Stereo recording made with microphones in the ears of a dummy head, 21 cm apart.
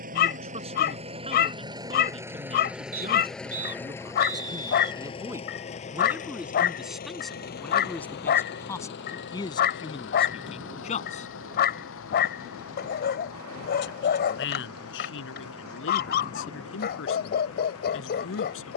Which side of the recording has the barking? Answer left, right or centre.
left.